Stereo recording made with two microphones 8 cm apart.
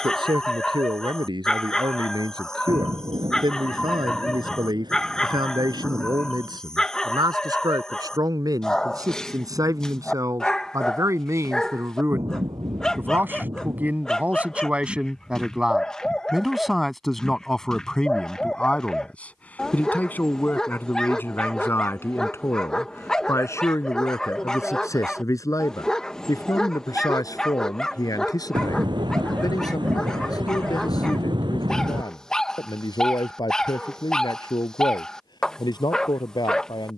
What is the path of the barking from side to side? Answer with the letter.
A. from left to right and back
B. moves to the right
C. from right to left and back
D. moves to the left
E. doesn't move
E.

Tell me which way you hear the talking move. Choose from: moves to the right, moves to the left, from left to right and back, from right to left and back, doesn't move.
moves to the left.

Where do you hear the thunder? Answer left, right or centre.
right.